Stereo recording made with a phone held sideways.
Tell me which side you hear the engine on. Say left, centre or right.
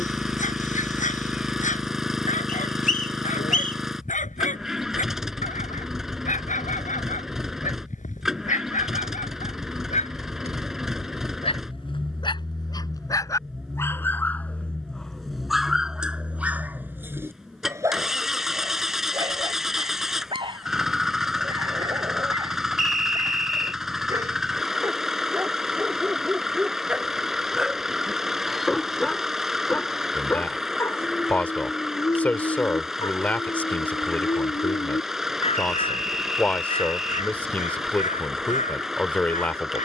centre.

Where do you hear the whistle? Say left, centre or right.
left.